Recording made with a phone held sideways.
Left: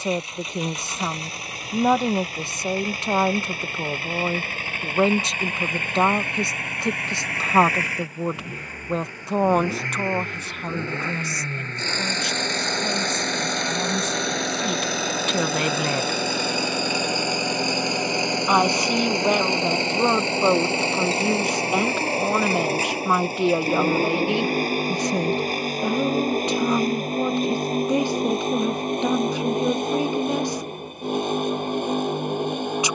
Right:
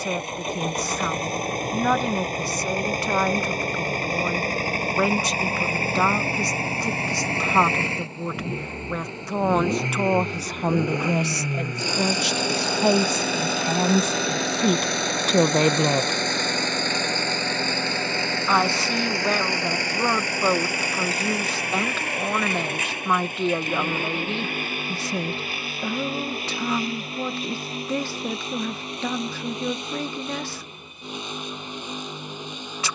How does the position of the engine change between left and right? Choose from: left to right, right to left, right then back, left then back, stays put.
right to left.